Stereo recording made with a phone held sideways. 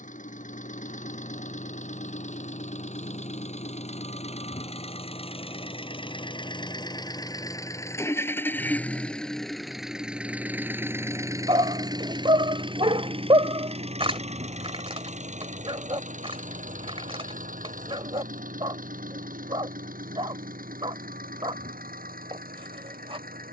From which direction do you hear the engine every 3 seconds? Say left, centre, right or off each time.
left, left, left, centre, right, right, right, right.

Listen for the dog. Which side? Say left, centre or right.
right.